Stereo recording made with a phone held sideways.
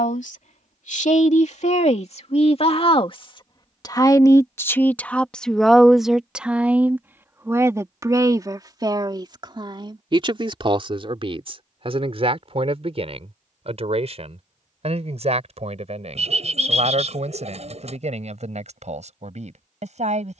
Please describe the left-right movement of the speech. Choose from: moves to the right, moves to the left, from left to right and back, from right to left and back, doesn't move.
moves to the right.